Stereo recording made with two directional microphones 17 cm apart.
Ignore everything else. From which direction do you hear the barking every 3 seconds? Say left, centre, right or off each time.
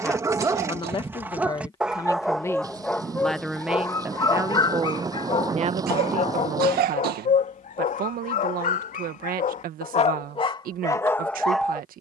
centre, left, left, left.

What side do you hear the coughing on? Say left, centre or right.
right.